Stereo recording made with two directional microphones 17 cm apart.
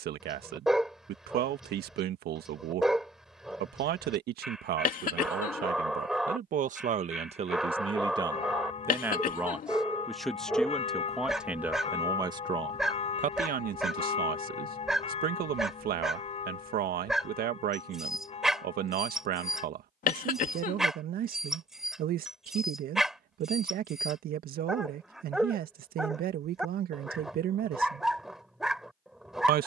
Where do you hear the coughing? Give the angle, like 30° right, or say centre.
50° left.